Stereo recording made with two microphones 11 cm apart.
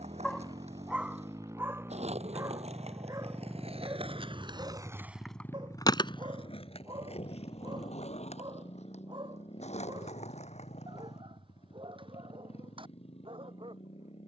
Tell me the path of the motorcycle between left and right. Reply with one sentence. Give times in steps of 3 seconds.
You can hear the motorcycle on the right from 0 s, in the centre from 3 s and on the left from 6 s.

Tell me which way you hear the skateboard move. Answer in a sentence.
In this clip you hear the skateboard go from the right side to the left.